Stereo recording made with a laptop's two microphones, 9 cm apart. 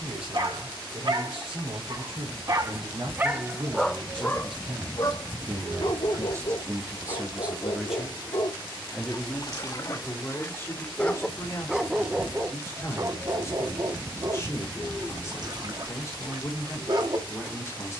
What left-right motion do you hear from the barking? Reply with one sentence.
You can hear the barking go left and come back.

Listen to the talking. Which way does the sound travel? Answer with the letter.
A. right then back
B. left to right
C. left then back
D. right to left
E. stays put
D.